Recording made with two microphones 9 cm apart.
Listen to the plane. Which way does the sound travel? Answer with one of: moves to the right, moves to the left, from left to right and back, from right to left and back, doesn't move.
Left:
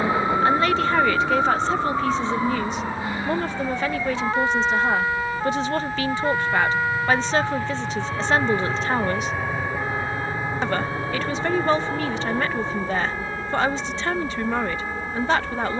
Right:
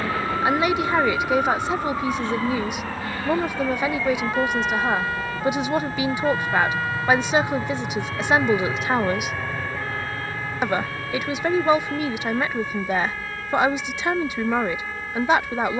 moves to the left.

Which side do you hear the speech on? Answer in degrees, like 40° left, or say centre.
10° right.